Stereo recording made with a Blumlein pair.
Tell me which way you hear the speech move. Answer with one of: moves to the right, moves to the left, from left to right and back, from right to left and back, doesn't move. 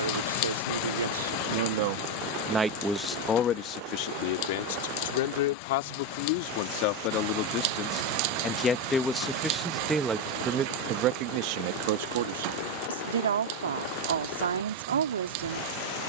from right to left and back.